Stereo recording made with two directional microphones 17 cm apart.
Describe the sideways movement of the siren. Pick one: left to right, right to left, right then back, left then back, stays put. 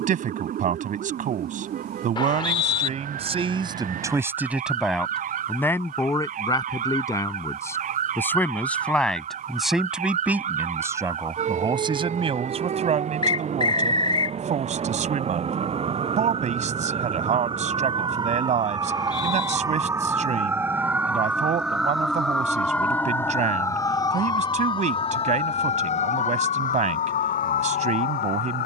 right to left.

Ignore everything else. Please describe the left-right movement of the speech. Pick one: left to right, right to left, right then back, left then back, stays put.
left then back.